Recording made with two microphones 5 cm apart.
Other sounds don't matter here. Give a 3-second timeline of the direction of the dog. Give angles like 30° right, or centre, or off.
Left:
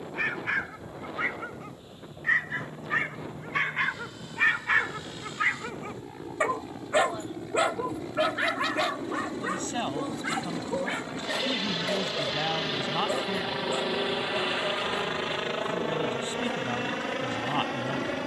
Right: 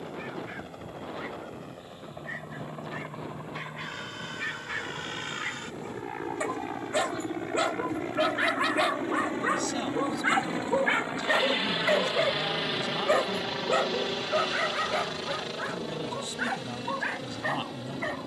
70° left, 60° left, 10° left, 30° right, 50° right, 60° right.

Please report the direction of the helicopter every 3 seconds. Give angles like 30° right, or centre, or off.
60° right, 60° right, 50° right, 30° right, 10° left, 40° left.